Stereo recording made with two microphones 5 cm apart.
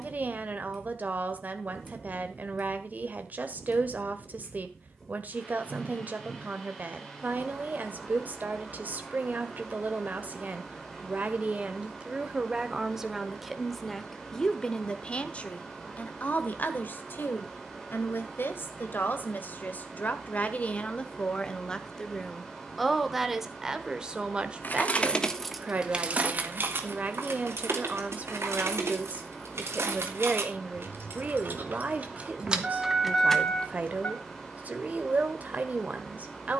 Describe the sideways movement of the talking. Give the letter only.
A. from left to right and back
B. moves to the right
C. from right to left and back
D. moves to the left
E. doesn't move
C.